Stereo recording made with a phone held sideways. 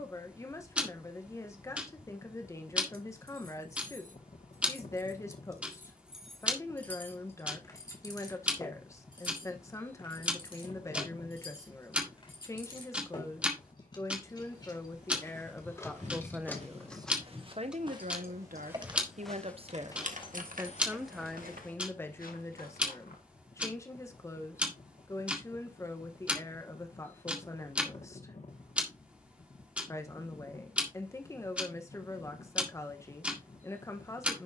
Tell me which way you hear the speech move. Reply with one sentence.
In this clip you hear the speech go right and come back.